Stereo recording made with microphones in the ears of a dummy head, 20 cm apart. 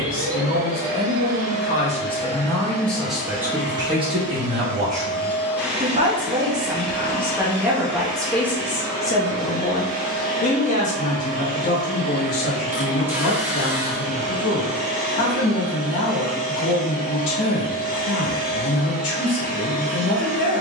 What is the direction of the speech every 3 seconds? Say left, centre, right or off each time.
left, right, centre, left, left, left, left.